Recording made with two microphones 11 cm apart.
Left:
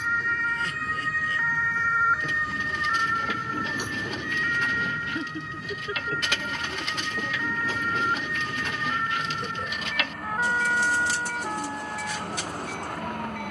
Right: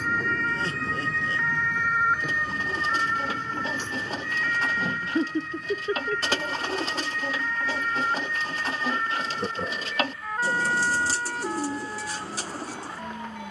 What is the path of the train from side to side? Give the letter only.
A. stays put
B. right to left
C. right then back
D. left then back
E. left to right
B.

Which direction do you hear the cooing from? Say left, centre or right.
right.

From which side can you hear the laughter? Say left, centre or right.
right.